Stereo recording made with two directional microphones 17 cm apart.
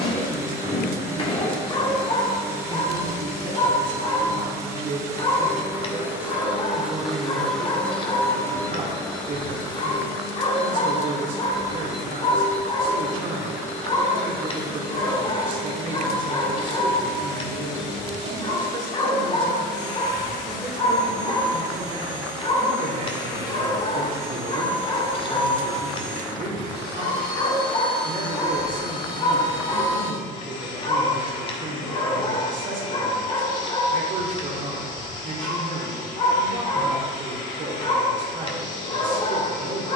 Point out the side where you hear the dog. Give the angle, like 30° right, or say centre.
30° left.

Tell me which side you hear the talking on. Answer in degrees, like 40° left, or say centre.
50° right.